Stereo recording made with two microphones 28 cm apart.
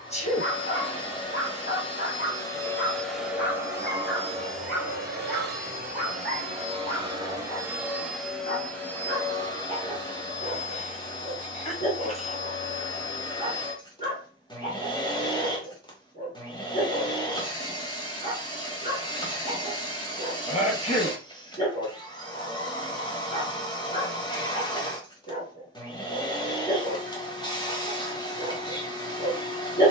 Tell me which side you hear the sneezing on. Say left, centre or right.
left.